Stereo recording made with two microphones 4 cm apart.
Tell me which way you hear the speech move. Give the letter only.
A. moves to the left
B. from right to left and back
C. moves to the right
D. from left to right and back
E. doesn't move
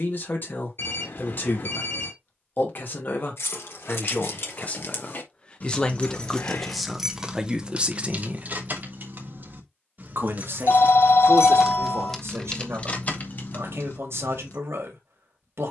C.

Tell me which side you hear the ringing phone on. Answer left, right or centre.
left.